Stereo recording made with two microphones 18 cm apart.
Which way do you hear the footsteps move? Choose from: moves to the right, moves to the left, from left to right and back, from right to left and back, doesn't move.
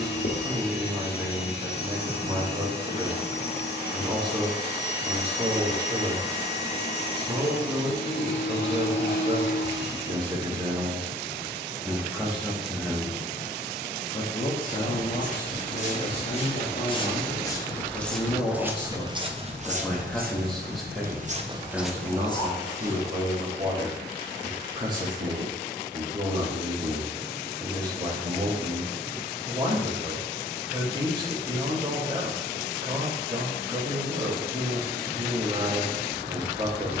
from left to right and back.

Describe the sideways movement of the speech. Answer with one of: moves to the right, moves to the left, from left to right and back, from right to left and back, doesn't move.
from right to left and back.